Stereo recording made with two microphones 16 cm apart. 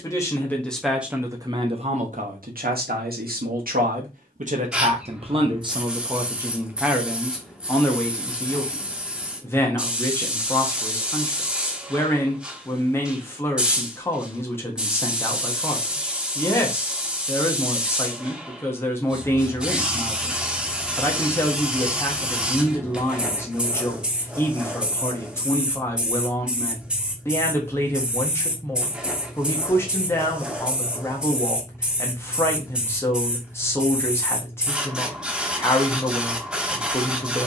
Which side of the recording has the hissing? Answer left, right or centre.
centre.